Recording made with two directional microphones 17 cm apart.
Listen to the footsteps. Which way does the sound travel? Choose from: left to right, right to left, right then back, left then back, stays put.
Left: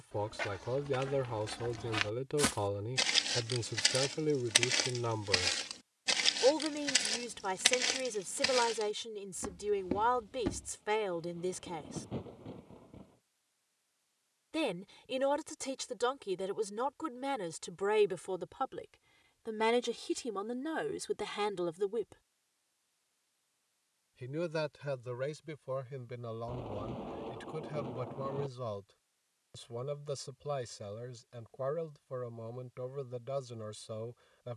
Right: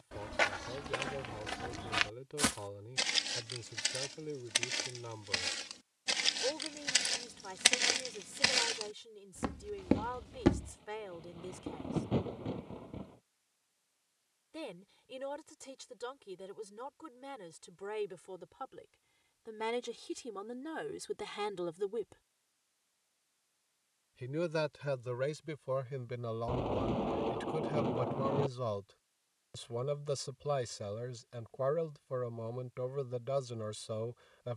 left then back.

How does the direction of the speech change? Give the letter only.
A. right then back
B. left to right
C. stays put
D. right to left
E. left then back
B.